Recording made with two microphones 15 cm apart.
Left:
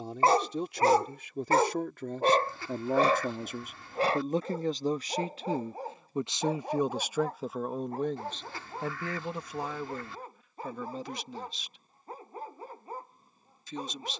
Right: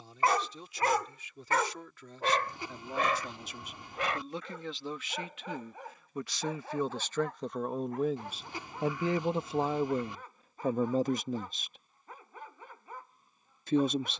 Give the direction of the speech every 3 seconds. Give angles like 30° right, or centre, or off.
60° left, 40° left, 10° left, 40° right, 60° right.